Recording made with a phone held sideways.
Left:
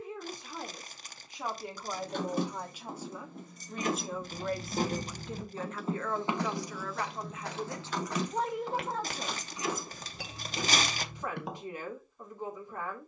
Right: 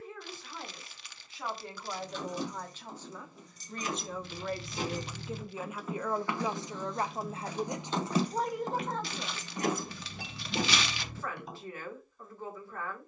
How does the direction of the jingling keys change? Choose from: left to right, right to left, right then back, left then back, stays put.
left to right.